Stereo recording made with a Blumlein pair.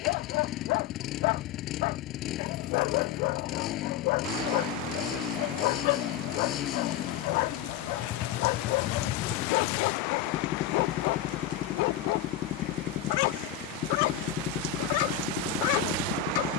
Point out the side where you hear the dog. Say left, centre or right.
left.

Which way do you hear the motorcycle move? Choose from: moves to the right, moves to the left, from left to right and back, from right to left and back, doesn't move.
doesn't move.